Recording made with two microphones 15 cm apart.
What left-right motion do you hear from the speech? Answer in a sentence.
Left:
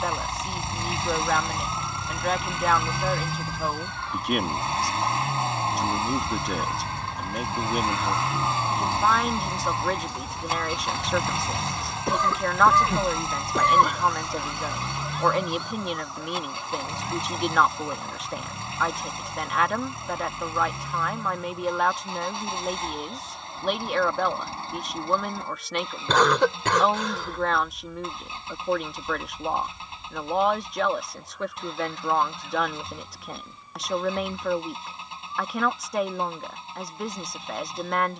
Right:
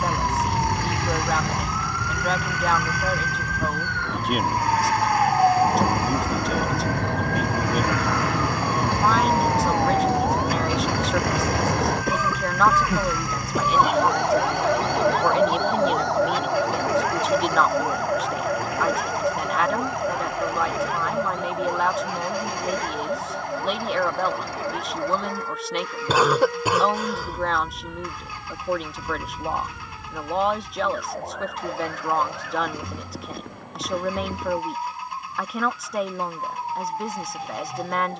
You can hear the speech stay in one place.